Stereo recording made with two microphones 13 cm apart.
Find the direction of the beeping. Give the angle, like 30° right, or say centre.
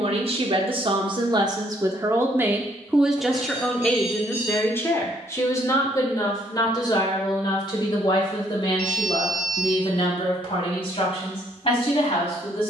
70° left.